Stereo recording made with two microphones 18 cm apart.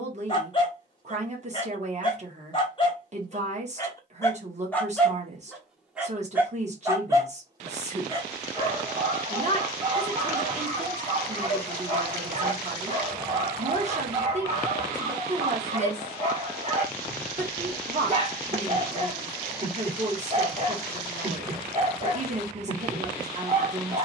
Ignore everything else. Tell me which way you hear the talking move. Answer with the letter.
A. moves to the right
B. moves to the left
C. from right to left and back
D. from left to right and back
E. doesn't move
E.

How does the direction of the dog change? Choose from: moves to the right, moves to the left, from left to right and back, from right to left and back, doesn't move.
moves to the right.